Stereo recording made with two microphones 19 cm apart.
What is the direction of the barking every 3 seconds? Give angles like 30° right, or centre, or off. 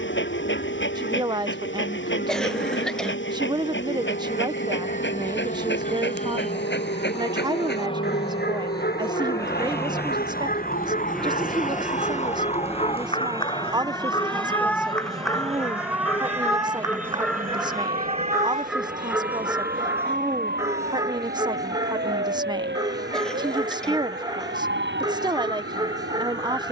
70° left, 70° left, 60° left, 40° left, 30° left, 10° left, 10° right, 20° right, 20° right.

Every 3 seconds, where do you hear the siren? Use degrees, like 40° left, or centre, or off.
80° left, 70° left, 70° left, 50° left, 20° left, 10° right, 40° right, 50° right, 60° right.